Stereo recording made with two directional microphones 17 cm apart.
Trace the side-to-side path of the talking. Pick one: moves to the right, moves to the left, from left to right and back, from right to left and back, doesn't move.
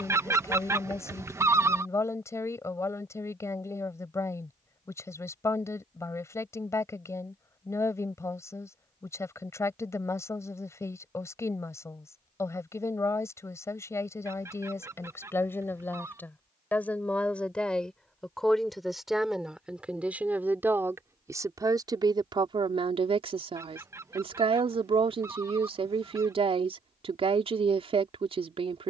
moves to the right.